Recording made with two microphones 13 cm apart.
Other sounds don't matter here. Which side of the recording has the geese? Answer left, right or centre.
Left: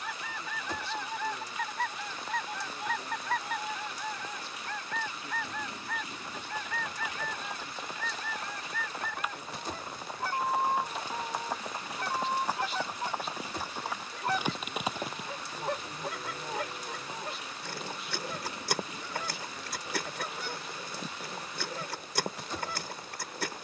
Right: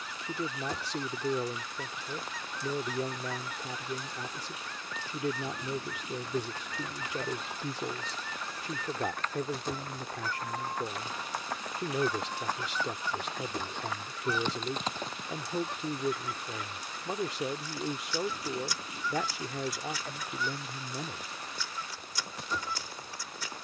left.